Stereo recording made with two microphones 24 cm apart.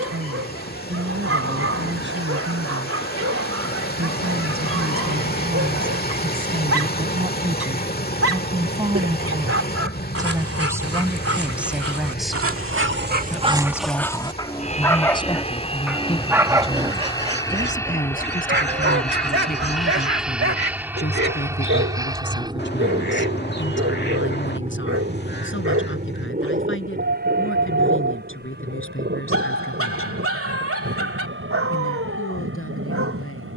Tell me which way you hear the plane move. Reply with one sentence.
You can hear the plane go from the left side to the right.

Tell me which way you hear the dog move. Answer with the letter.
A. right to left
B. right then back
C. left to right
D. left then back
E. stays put
D.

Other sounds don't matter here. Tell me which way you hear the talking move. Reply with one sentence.
In this clip you hear the talking go from the right side to the left.